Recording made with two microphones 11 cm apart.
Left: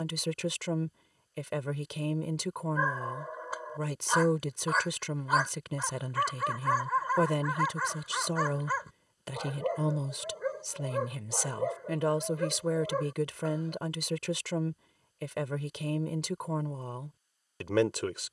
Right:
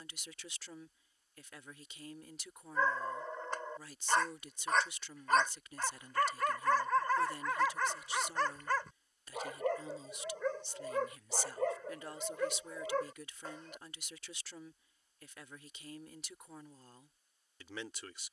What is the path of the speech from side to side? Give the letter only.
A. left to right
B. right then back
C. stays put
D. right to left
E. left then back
C.